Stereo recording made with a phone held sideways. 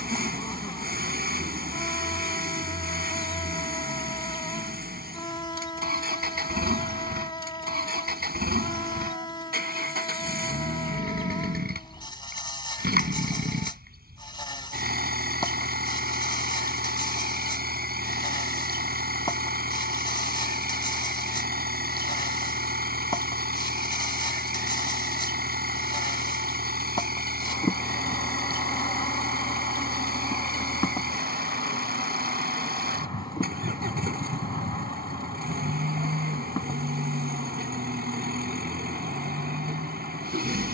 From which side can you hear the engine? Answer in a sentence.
In this clip you hear the engine on the right.